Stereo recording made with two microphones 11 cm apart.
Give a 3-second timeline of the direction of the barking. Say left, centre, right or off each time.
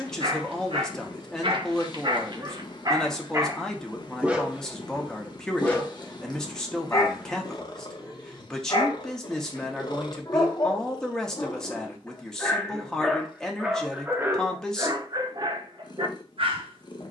right, centre, left, left, centre, right.